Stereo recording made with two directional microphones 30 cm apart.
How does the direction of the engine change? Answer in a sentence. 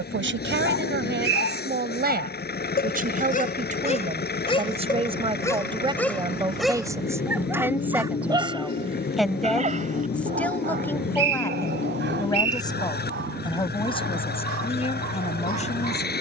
You can hear the engine stay put.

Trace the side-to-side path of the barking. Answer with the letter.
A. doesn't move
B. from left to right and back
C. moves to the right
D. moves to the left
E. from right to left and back
C.